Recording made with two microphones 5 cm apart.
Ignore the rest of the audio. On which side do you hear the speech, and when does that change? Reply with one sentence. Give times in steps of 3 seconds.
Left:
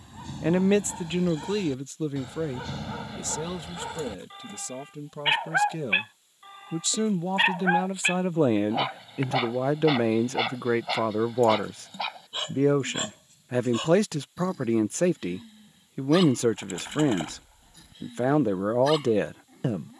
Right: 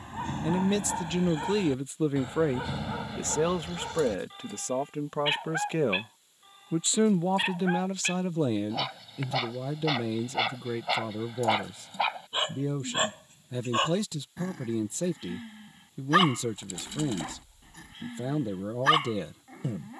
In this clip you hear the speech in the centre from 0 s, on the right from 3 s, in the centre from 6 s and on the left from 9 s.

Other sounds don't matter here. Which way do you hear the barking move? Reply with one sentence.
In this clip you hear the barking move from right to left and back again.